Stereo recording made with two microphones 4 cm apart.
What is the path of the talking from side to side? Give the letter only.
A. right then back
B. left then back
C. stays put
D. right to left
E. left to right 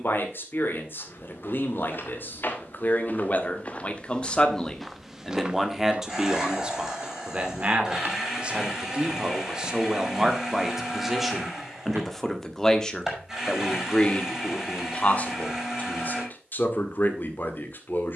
A.